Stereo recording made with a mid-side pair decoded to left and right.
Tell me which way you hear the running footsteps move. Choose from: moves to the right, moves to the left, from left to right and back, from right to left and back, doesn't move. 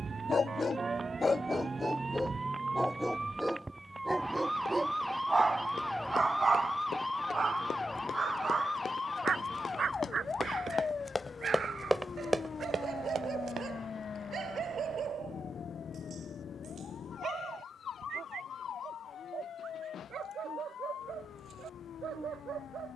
moves to the right.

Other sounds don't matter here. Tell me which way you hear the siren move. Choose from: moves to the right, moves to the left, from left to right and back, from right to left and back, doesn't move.
moves to the left.